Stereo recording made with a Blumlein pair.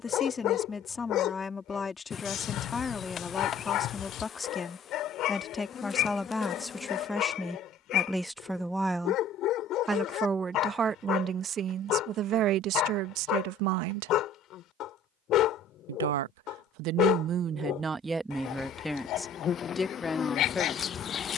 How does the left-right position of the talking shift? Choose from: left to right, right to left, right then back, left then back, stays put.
right then back.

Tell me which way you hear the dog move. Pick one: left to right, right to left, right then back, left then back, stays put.
stays put.